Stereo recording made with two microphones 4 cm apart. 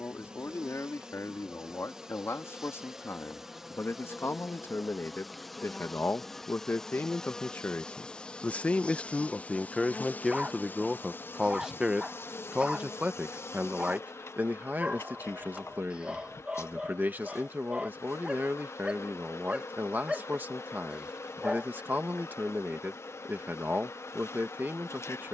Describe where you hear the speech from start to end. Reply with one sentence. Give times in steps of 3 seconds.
In this clip you hear the speech on the left from 0 s, in the centre from 9 s and on the right from 12 s.